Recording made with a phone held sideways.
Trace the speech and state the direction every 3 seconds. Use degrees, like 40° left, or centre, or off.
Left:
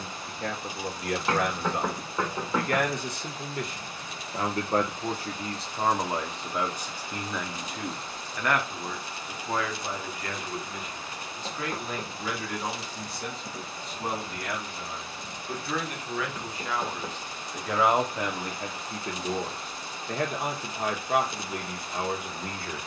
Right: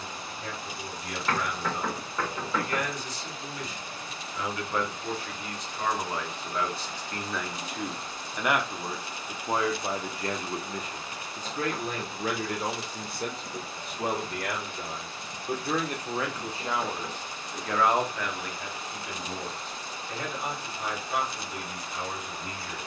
60° left, 40° left, centre, 30° right, 50° right, 20° right, 40° left, 50° left.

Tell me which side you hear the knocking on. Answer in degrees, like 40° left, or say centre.
20° left.